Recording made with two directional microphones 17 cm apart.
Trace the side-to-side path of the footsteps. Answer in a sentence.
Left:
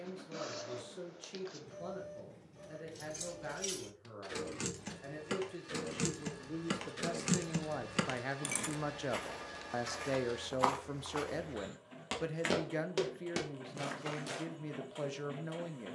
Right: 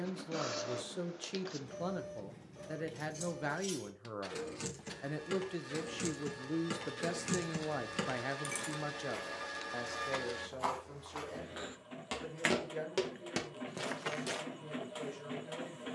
In this clip you hear the footsteps go from the left side to the right.